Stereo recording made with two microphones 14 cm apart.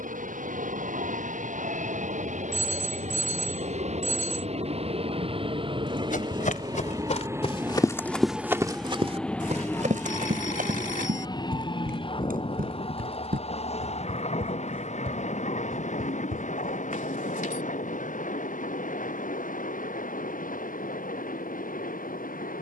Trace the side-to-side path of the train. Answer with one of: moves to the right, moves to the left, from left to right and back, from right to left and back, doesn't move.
moves to the left.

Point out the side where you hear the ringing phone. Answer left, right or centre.
left.